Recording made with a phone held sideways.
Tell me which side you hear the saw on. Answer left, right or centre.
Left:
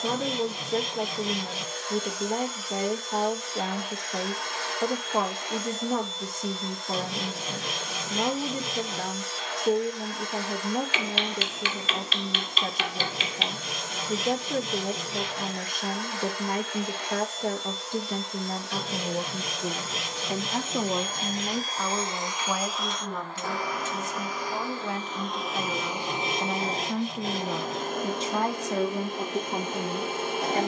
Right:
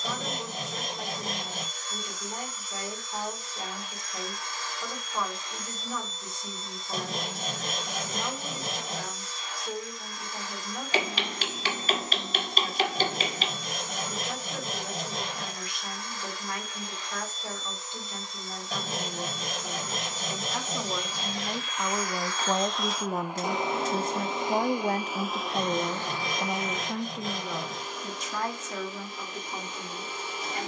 right.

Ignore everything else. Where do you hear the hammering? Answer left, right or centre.
right.